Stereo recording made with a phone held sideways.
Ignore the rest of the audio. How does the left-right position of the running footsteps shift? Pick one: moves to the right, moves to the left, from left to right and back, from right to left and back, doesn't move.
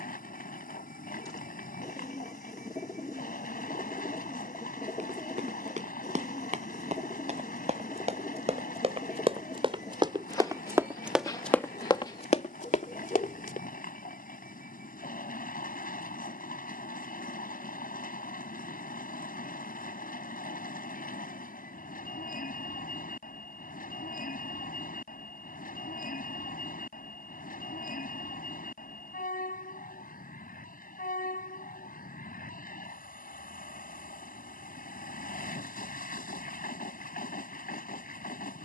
moves to the left.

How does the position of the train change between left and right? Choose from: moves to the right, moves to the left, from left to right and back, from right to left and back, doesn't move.
doesn't move.